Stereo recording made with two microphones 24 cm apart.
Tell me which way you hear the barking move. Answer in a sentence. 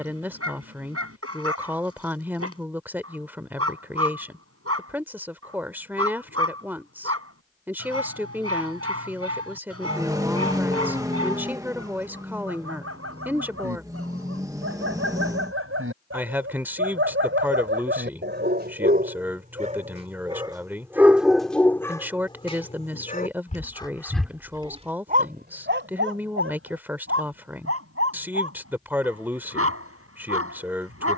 You can hear the barking move from right to left and back again.